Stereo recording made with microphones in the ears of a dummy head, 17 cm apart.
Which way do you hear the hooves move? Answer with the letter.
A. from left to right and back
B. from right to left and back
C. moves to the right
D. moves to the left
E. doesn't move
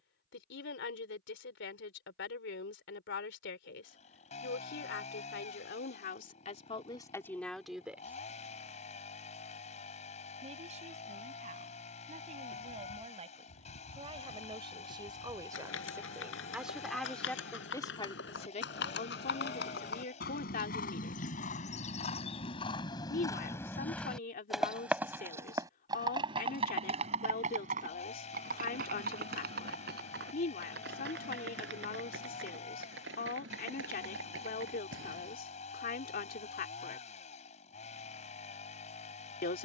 C.